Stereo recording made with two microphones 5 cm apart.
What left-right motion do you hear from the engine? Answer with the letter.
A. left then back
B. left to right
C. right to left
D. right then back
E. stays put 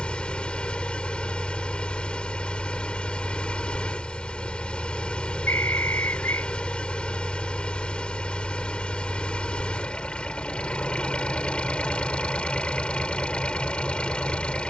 E.